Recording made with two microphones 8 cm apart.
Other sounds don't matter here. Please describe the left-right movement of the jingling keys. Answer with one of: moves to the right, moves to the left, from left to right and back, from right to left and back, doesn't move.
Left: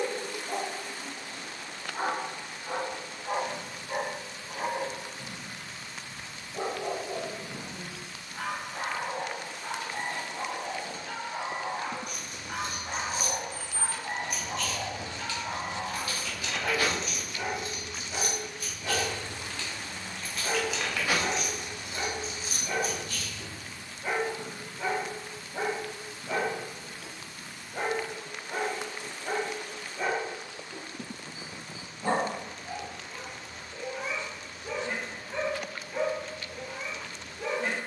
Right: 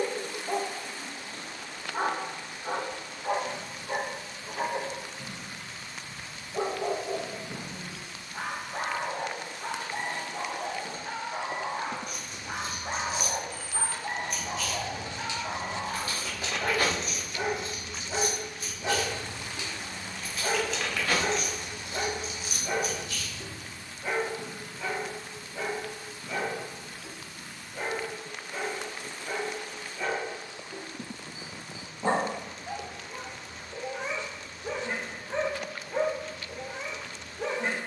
from left to right and back.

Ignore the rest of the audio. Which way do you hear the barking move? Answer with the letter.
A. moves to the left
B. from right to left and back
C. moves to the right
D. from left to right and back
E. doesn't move
B.